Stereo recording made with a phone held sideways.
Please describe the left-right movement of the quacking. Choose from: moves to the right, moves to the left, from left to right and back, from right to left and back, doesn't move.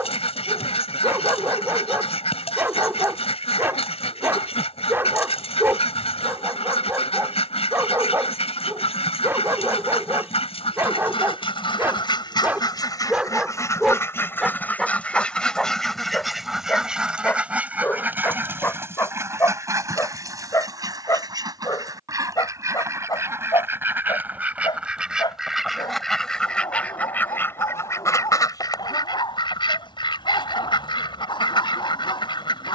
from left to right and back.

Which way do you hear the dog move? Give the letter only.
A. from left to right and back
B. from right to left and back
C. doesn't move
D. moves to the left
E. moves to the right
D.